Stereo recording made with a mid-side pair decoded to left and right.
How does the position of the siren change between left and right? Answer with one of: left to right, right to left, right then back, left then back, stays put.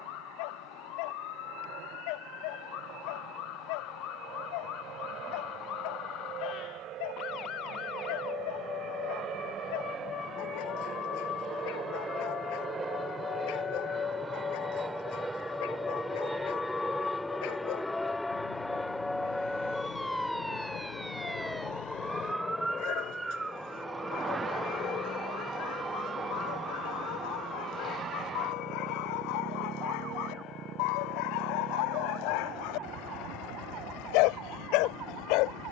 left to right.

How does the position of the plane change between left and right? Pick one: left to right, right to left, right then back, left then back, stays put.
right to left.